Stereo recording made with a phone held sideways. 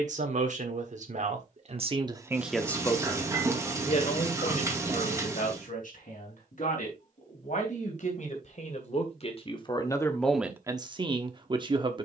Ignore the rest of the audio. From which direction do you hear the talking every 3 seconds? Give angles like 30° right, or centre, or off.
40° right, 60° left, 60° left, centre.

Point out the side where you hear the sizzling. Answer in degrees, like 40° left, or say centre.
20° right.